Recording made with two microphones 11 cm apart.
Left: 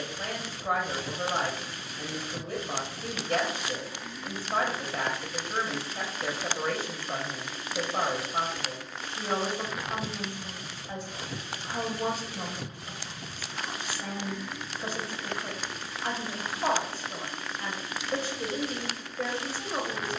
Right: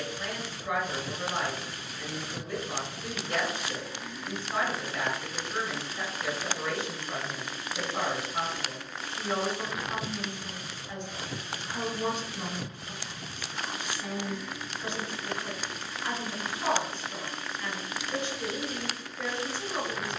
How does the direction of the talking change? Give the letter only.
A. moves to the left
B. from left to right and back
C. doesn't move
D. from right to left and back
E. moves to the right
C.